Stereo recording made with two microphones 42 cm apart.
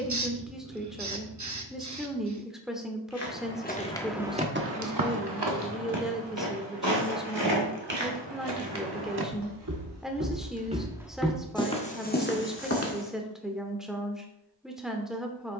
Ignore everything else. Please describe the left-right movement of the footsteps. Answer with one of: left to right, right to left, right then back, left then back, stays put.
right then back.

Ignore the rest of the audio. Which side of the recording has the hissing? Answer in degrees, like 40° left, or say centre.
40° right.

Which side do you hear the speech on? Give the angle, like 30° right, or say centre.
centre.